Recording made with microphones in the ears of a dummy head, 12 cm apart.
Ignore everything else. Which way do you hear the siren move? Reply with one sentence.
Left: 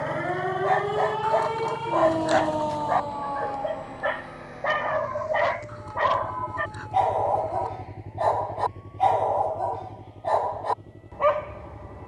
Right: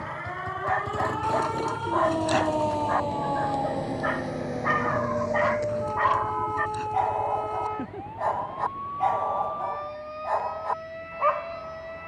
You can hear the siren move from left to right.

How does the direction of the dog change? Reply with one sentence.
You can hear the dog stay put.